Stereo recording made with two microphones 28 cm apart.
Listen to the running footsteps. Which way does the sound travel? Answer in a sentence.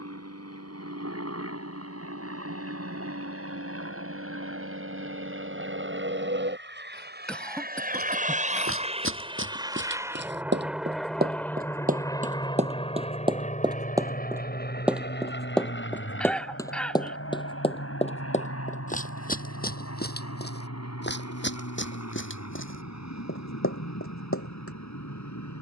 You can hear the running footsteps move from right to left.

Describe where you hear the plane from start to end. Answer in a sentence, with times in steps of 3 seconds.
You can hear the plane on the right from 0 s, in the centre from 9 s and on the left from 12 s.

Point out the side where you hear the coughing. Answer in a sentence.
You can hear the coughing in the centre.